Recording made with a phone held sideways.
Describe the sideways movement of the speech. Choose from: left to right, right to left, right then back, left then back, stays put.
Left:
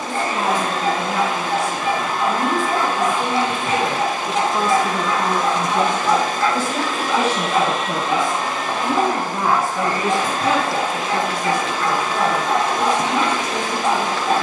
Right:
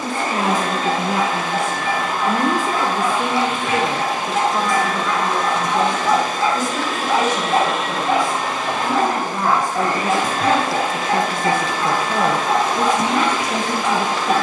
left then back.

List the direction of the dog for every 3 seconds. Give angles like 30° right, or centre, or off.
30° left, 20° left, 30° right, 50° right, 10° left.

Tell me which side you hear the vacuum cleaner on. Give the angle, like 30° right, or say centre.
50° right.